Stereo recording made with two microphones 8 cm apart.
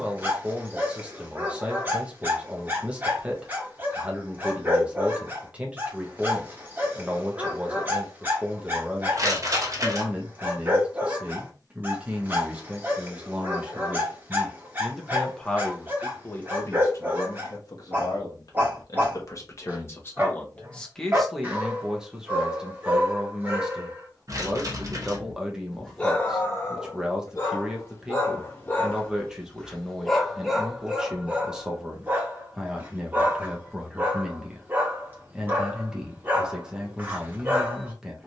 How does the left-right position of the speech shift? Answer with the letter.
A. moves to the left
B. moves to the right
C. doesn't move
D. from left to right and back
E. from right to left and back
E.